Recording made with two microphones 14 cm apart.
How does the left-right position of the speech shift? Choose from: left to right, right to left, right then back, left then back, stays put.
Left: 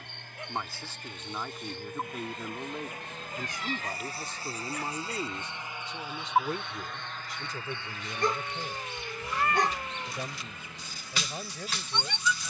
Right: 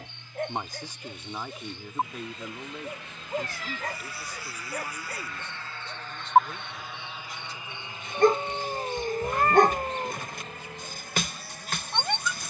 right to left.